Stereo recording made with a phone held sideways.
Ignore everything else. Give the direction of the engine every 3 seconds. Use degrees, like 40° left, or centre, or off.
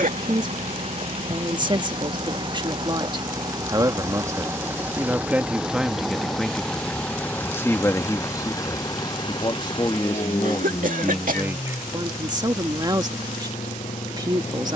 40° right, 20° right, 10° left, 40° left, 50° left.